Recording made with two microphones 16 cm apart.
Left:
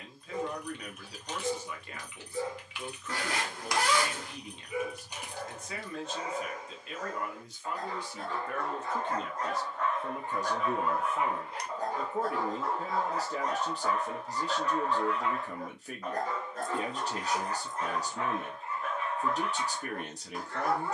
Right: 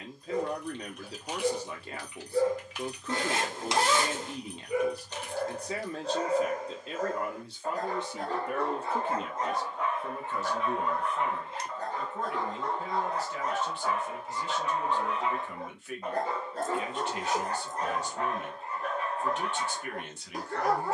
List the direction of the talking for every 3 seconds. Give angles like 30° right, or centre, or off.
30° right, 30° right, 20° right, 10° left, 40° left, 40° left, 40° left.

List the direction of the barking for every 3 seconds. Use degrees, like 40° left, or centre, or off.
40° right, 40° right, 40° right, centre, centre, 30° right, 40° right.